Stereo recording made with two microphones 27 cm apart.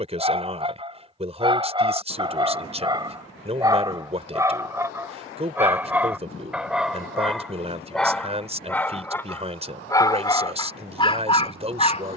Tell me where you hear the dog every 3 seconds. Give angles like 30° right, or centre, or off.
20° right, 10° right, centre, 20° left.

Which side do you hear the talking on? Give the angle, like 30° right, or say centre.
20° right.